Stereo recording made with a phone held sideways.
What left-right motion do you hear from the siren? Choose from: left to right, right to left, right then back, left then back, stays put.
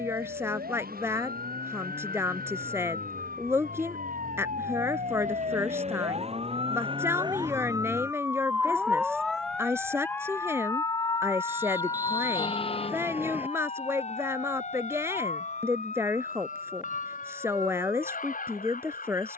right to left.